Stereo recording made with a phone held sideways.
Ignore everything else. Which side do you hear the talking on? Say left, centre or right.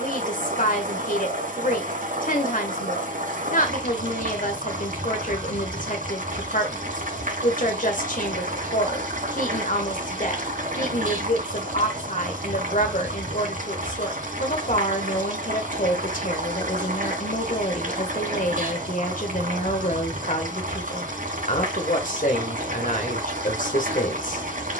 left.